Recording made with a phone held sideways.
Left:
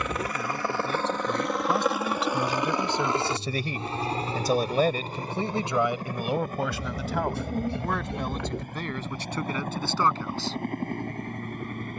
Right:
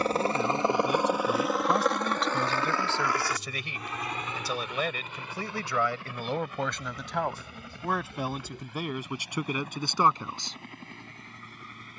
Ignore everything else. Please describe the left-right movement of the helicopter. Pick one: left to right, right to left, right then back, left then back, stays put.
right to left.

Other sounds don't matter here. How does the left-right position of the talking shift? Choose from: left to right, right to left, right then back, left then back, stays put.
left then back.